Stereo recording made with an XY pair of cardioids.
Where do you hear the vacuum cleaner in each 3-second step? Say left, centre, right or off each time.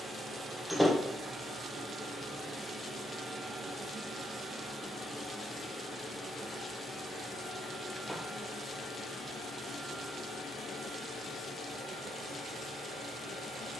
right, centre, left, left, left.